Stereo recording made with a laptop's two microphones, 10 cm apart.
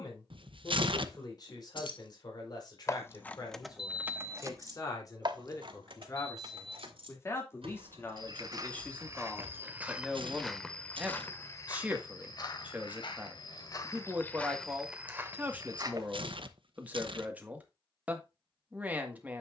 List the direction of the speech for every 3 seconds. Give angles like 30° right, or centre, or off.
40° left, 40° left, 30° left, centre, 10° right, 10° right, 10° right.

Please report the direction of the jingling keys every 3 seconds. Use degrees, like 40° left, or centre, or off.
50° left, 20° right, 70° right, 80° right, off, off, off.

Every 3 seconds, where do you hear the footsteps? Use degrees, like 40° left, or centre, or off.
off, off, 40° right, centre, 30° left, 30° right, off.